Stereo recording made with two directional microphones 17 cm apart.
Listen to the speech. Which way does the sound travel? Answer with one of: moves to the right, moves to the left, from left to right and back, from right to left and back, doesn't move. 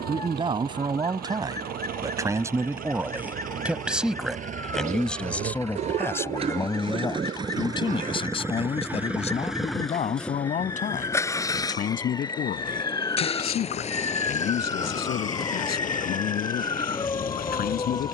moves to the left.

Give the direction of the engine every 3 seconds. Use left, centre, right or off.
right, right, right, centre, left, left.